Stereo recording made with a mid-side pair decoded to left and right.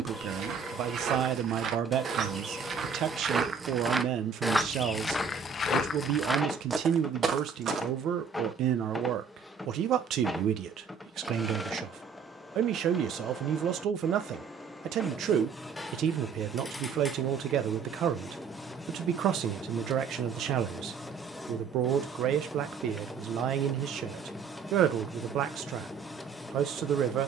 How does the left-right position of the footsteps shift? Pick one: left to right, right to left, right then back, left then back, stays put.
left then back.